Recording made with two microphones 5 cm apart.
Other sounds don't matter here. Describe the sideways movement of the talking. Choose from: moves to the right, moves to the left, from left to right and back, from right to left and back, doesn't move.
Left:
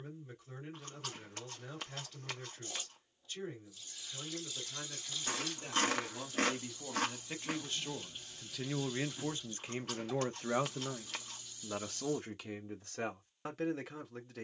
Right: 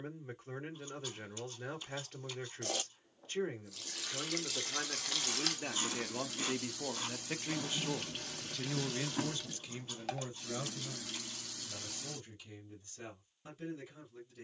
moves to the left.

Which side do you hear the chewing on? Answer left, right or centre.
left.